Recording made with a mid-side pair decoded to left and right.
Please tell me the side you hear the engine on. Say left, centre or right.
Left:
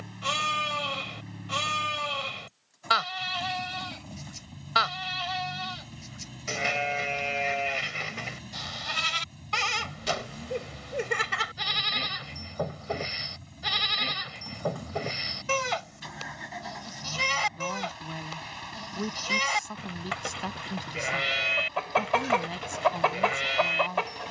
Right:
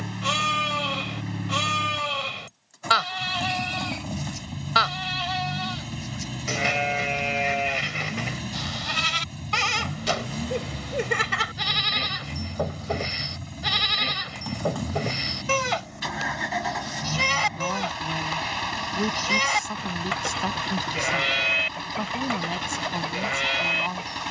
right.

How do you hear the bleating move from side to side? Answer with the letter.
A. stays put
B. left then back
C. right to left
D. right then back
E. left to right
A.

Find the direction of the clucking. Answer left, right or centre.
left.